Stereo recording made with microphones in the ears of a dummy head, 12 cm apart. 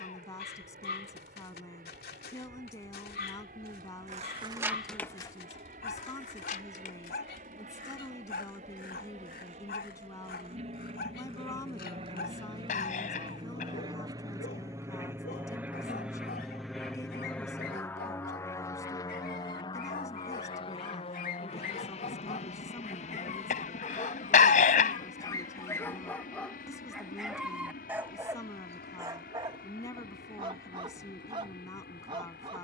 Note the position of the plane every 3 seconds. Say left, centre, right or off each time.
right, right, right, right, right, centre, left, left, left, left, left.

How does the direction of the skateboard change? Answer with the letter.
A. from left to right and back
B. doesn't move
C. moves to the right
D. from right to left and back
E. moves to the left
E.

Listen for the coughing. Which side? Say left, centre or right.
left.